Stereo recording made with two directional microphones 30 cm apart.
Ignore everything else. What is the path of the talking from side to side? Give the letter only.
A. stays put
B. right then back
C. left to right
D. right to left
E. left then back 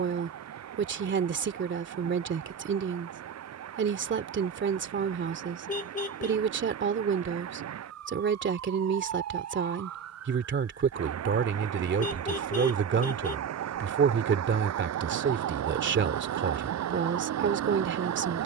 A.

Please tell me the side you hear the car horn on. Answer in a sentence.
You can hear the car horn on the left.